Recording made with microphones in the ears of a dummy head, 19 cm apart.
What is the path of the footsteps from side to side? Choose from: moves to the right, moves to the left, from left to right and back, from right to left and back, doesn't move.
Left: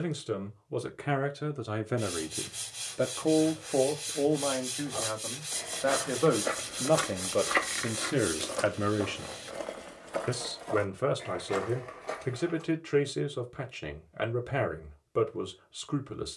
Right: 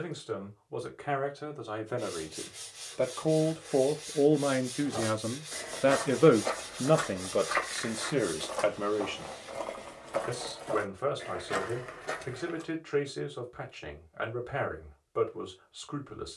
from right to left and back.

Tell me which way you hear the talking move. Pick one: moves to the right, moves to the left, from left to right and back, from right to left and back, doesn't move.
from left to right and back.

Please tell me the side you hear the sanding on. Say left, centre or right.
left.